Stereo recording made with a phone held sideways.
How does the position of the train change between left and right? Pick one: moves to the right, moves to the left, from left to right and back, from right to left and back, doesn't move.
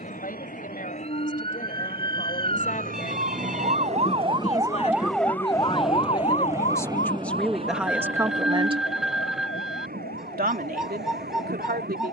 moves to the right.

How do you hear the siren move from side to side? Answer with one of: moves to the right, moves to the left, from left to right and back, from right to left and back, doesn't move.
moves to the left.